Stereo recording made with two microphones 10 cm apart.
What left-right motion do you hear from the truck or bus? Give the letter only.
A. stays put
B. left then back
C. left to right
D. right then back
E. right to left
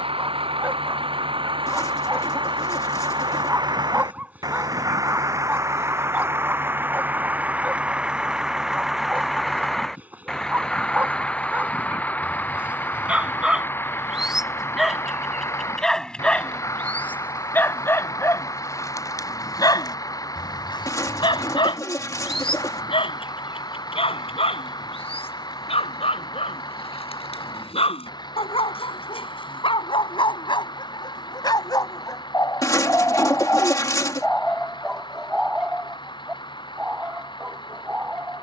E.